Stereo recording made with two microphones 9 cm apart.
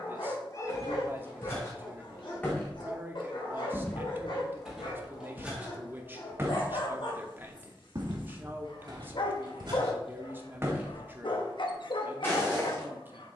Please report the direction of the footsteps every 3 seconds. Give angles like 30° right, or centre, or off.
30° left, centre, 40° right, 40° right, 30° left.